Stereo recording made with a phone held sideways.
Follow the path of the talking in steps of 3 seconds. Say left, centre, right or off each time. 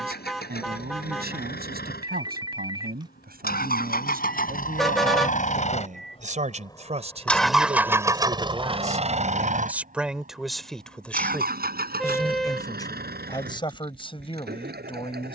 right, right, right, centre, left.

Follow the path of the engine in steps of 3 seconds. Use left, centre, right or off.
left, left, centre, right, right.